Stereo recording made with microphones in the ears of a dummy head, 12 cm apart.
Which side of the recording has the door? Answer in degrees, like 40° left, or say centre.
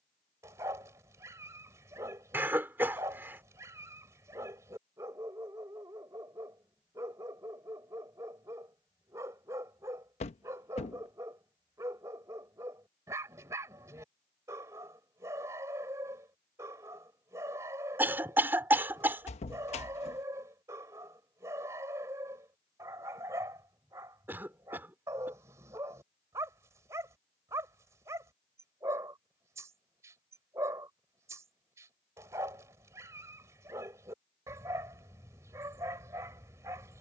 50° left.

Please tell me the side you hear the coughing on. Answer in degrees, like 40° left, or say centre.
20° right.